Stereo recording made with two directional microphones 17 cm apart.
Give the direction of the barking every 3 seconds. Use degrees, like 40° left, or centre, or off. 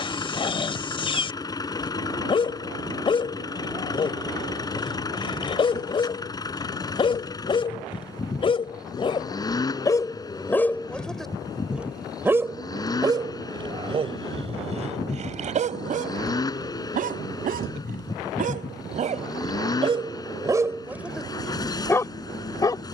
30° left, 30° left, 30° left, 10° left, 30° right, 50° right, 30° right, 10° left.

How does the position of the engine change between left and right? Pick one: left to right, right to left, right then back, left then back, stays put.
stays put.